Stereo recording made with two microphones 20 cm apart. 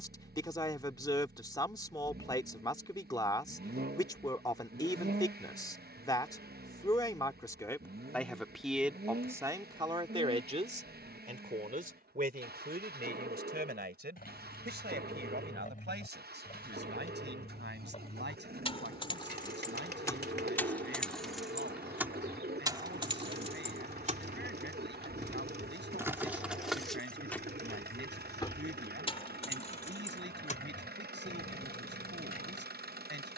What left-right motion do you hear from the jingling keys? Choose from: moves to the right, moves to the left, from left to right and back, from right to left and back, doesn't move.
from left to right and back.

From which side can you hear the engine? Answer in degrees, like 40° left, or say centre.
60° right.